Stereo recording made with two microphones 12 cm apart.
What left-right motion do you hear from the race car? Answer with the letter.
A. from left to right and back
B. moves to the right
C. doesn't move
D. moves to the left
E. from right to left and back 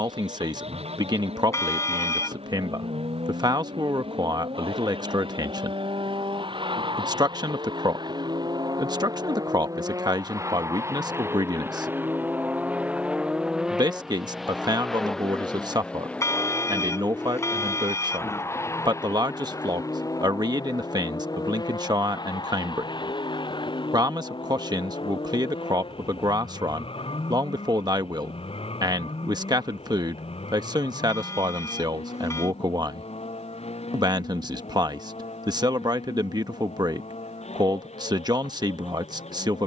D.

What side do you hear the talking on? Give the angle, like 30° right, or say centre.
40° right.